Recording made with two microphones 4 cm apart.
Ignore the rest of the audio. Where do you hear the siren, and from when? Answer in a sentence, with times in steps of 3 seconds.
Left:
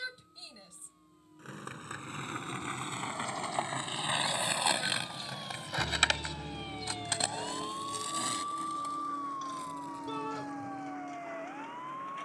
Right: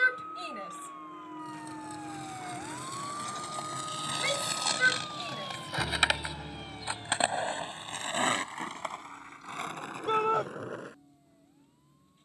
You can hear the siren on the right from 0 s and on the left from 6 s.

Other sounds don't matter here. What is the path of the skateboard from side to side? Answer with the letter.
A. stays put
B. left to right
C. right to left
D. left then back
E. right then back
B.